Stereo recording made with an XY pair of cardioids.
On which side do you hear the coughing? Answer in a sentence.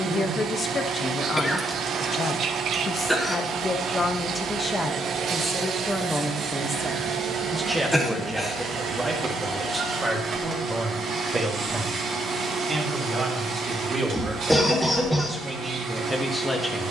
You can hear the coughing in the centre.